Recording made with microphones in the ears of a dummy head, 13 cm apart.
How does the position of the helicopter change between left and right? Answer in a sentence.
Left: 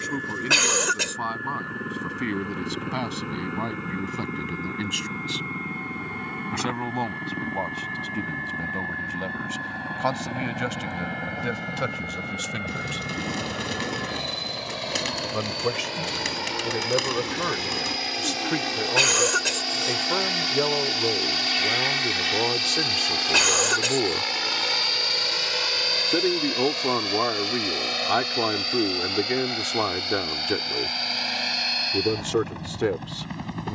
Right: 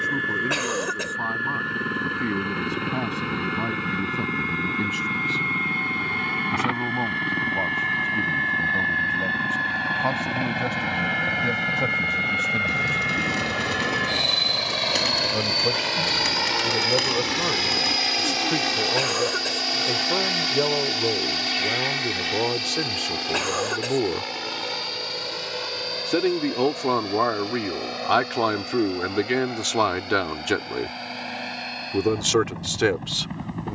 In this clip you hear the helicopter move to the left.